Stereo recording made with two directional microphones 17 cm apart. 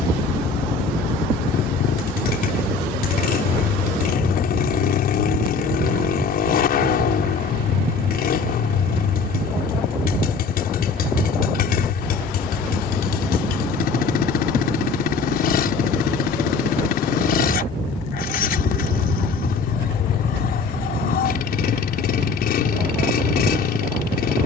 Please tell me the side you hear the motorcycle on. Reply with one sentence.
In this clip you hear the motorcycle on the left.